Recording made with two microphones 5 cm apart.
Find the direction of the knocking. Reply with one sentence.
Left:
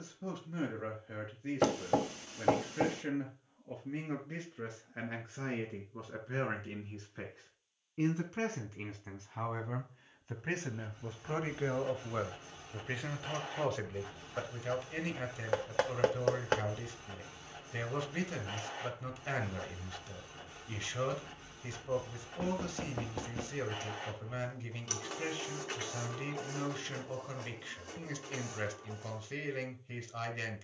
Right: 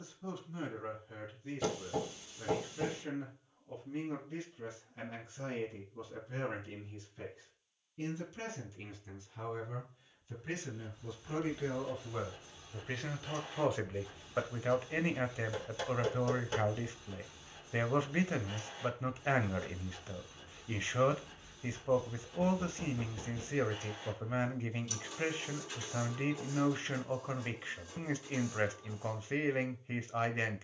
You can hear the knocking on the left.